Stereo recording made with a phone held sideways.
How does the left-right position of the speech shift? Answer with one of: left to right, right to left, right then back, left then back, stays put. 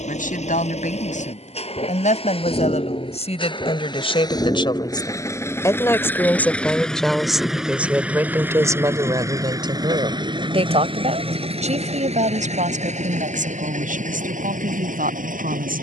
left to right.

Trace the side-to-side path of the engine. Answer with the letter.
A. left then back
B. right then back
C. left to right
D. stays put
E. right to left
C.